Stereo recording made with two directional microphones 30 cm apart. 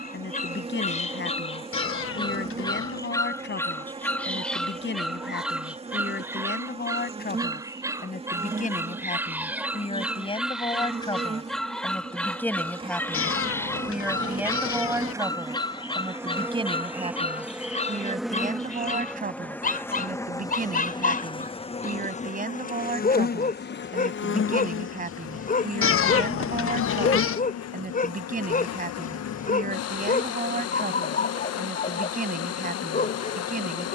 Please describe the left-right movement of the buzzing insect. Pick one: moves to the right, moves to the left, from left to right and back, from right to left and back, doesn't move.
moves to the left.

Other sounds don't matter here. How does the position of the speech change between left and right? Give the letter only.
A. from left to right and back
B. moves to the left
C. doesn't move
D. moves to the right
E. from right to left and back
D.